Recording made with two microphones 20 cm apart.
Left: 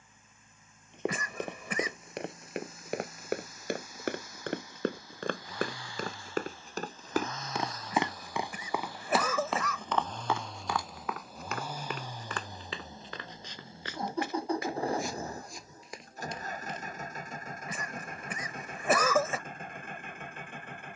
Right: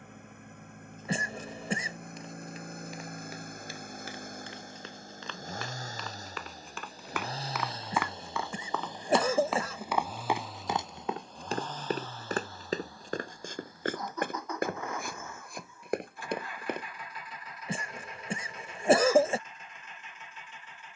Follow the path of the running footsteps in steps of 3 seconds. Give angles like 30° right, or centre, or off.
70° left, 60° left, 30° left, 20° right, 50° right, 60° right, off.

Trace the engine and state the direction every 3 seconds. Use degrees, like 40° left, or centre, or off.
60° right, 50° right, 30° right, centre, 20° left, 40° left, 50° left.